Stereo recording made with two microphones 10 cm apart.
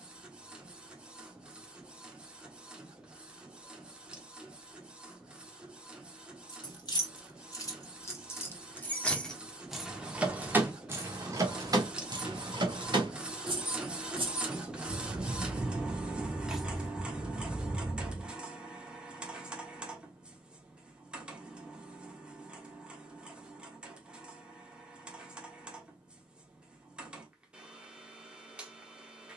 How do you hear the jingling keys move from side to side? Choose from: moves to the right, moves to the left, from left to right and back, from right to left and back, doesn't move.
from left to right and back.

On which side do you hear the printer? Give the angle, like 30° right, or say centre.
10° right.